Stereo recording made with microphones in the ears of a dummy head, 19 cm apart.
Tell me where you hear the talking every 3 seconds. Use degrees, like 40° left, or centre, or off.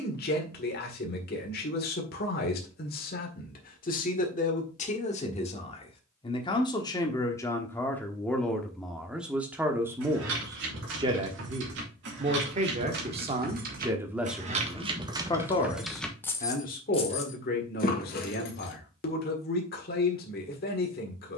50° left, 40° left, 10° left, 20° right, 20° right, 40° left, 50° left.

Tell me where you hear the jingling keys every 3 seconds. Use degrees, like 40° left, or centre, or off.
off, off, off, 70° right, 50° right, 10° left, 50° left.